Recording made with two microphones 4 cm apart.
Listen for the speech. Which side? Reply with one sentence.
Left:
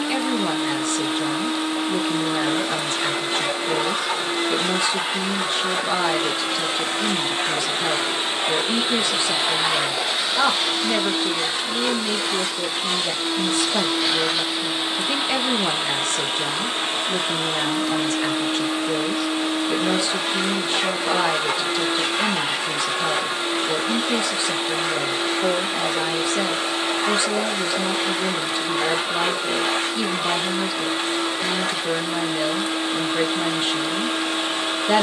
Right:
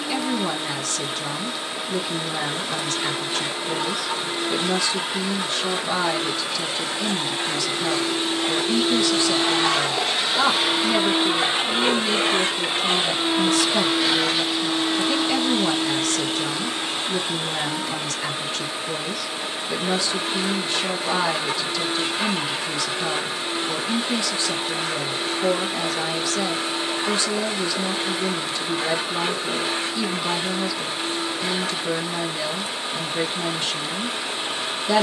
In this clip you hear the speech on the left.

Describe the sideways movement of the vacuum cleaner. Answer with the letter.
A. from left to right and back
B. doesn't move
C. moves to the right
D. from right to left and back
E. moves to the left
A.